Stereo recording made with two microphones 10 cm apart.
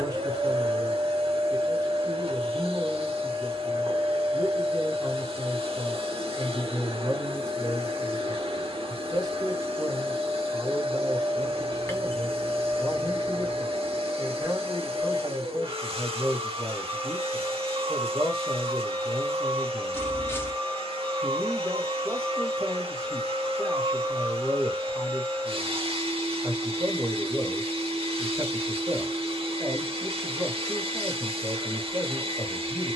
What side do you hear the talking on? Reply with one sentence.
You can hear the talking on the right.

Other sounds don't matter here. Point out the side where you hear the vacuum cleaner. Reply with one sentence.
In this clip you hear the vacuum cleaner on the right.